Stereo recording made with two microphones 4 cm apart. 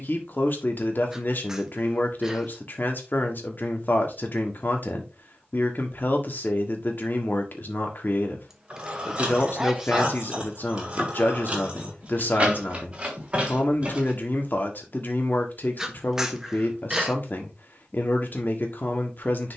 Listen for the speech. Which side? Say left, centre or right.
left.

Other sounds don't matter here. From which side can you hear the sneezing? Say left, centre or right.
centre.